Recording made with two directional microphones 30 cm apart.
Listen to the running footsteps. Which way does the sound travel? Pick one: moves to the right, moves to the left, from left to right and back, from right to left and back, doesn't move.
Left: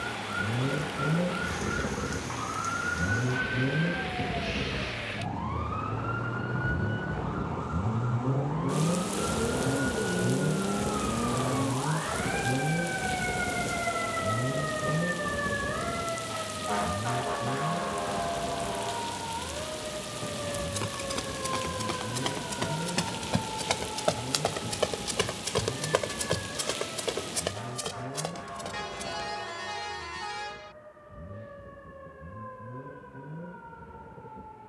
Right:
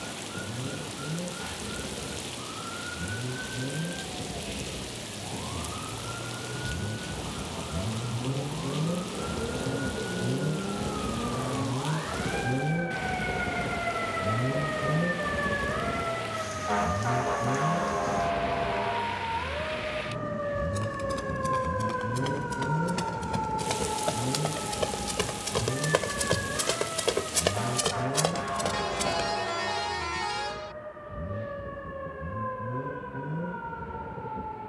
moves to the right.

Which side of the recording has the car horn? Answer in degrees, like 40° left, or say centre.
30° right.